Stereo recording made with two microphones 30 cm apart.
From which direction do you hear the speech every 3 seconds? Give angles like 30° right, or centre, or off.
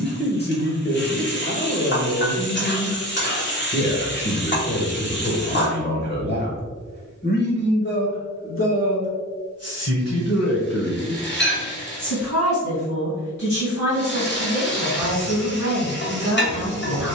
30° left, 30° left, 40° left, 60° left, 70° left, 70° left.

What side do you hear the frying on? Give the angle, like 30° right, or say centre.
40° left.